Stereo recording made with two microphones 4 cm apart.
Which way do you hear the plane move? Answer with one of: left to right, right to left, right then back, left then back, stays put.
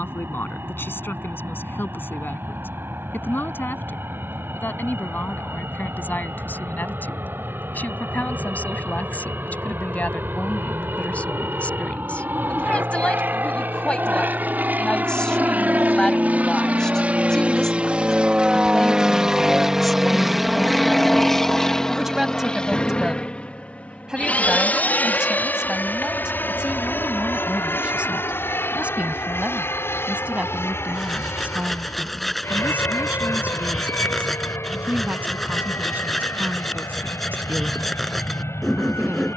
right to left.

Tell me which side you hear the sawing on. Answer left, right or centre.
centre.